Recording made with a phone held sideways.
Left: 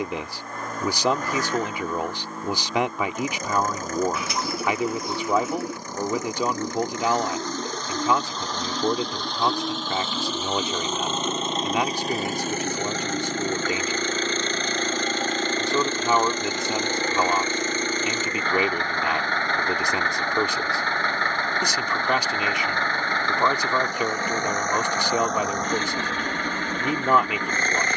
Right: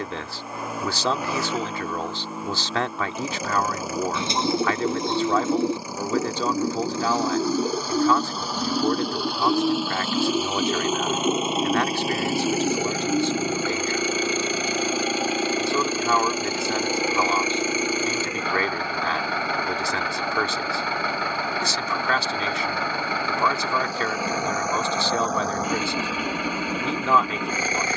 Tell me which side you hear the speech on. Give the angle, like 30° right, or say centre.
20° left.